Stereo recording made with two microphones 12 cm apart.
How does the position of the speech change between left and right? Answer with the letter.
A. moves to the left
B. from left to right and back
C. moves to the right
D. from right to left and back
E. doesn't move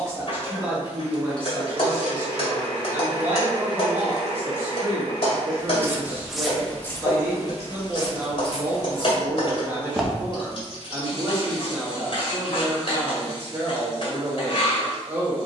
E.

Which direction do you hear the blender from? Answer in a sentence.
You can hear the blender on the right.